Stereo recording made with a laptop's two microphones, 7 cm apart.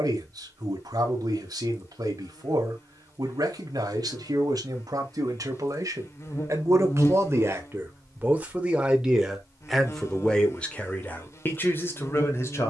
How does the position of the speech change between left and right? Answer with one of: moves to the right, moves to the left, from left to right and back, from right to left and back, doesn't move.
moves to the left.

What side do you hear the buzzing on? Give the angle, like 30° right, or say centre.
40° left.